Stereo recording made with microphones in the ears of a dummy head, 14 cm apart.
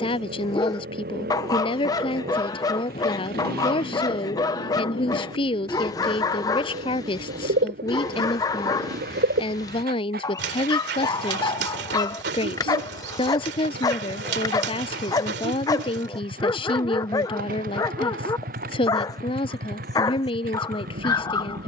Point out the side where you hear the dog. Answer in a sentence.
You can hear the dog on the left.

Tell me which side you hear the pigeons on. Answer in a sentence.
In this clip you hear the pigeons on the right.